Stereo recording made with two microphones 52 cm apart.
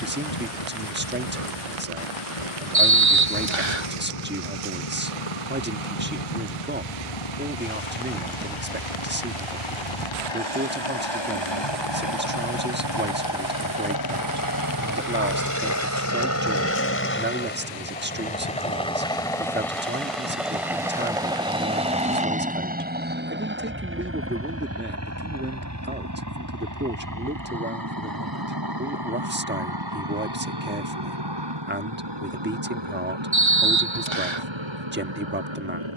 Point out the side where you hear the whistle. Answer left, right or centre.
right.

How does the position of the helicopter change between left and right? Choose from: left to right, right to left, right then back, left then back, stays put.
left to right.